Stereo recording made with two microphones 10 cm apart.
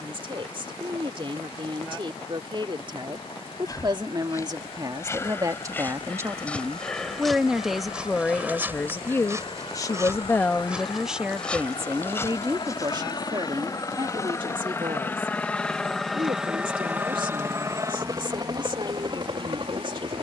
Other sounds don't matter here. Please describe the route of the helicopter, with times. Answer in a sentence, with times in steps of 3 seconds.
In this clip you hear the helicopter on the left from 0 s, in the centre from 15 s and on the right from 18 s.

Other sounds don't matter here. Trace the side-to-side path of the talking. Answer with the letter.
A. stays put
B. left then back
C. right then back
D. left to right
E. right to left
B.